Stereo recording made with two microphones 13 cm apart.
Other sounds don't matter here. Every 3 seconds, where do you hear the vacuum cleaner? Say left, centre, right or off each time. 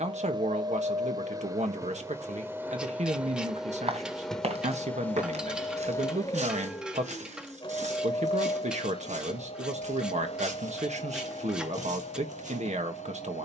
right, centre, left, left, left.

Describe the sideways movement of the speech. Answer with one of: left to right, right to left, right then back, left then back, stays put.
stays put.